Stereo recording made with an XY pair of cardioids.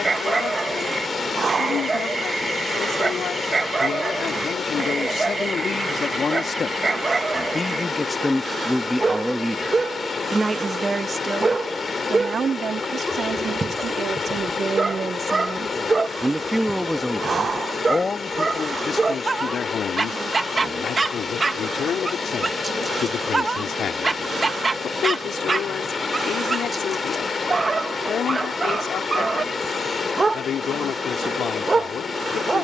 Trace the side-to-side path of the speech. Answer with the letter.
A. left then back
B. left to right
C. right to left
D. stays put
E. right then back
E.